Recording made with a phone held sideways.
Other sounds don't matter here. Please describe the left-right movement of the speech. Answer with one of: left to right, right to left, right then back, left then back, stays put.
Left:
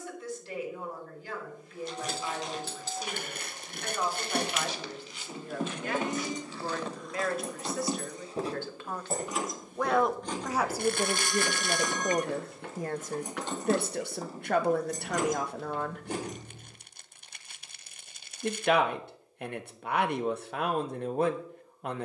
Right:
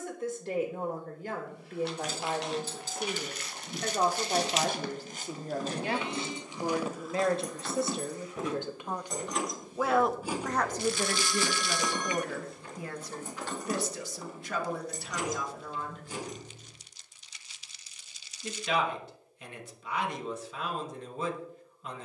right to left.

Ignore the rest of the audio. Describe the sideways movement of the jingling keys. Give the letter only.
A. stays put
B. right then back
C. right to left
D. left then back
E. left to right
B.